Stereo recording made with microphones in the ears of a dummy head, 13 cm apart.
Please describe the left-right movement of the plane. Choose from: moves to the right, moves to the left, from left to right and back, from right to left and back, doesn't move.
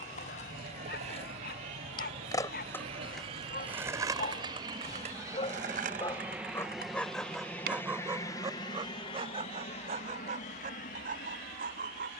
moves to the left.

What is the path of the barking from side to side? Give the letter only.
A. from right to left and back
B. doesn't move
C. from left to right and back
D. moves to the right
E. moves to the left
D.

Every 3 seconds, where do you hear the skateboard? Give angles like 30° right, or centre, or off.
40° left, 30° right, 70° right, off.